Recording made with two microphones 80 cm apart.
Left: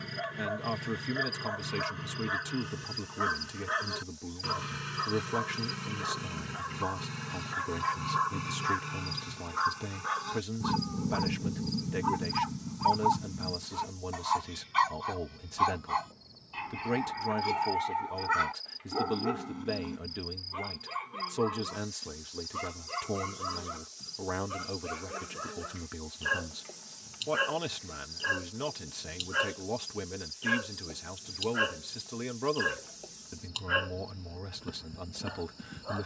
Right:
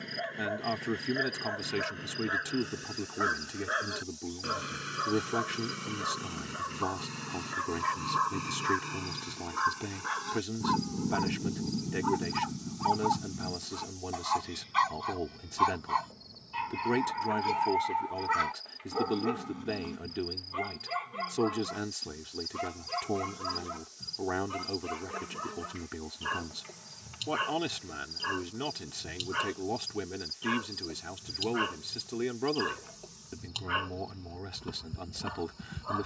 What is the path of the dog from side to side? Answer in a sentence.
In this clip you hear the dog move from left to right.